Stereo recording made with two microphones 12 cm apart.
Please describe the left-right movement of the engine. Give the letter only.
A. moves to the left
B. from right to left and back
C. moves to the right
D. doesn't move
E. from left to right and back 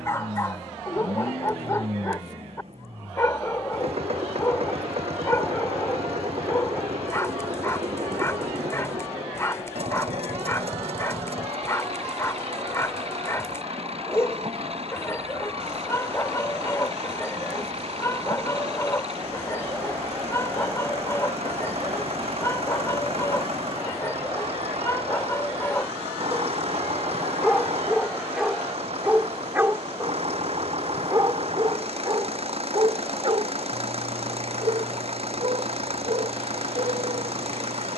D.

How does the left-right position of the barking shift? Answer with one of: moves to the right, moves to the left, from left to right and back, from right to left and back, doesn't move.
moves to the right.